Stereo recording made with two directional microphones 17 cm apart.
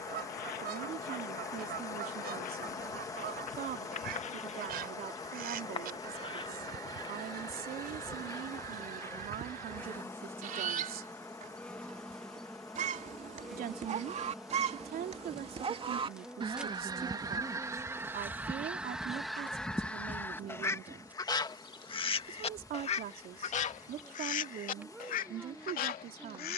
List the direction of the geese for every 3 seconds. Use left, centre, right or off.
right, right, right, right, right, right, centre, left, left.